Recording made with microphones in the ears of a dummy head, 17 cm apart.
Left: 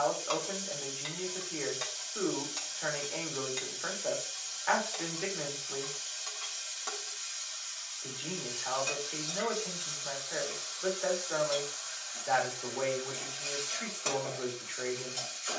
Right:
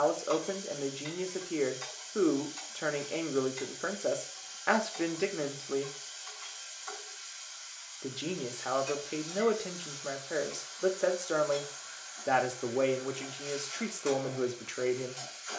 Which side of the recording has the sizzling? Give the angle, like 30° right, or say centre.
70° left.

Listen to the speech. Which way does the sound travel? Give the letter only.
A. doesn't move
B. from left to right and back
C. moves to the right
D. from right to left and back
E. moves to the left
A.